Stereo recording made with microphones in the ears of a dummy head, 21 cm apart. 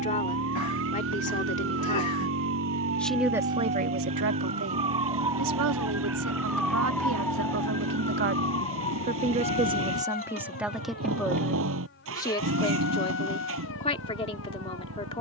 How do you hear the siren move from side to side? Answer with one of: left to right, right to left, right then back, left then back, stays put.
right to left.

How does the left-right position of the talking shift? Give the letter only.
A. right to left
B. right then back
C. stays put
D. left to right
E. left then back
B.